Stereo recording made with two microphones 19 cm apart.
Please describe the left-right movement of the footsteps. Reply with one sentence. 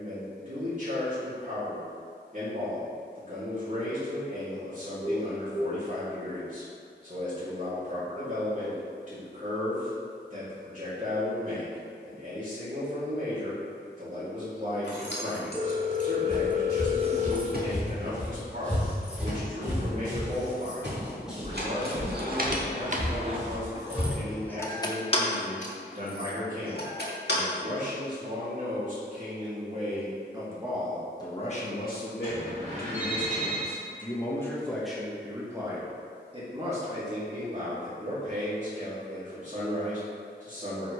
You can hear the footsteps go right and come back.